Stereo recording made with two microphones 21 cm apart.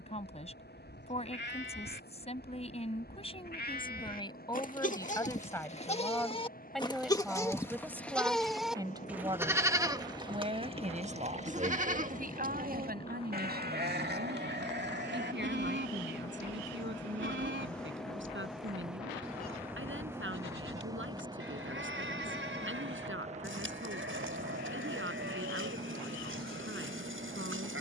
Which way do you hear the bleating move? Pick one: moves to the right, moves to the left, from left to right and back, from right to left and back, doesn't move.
moves to the right.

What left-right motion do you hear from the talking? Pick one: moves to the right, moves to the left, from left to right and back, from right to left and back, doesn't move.
moves to the right.